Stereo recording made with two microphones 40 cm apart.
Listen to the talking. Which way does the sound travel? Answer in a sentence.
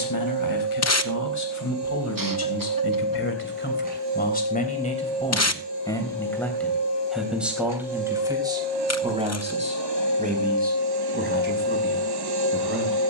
In this clip you hear the talking move from left to right.